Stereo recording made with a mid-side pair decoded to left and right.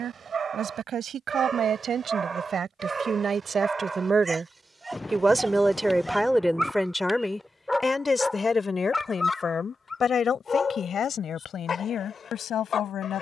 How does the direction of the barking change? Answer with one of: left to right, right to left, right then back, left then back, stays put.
right to left.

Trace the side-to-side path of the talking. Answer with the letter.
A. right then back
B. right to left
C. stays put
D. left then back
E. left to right
B.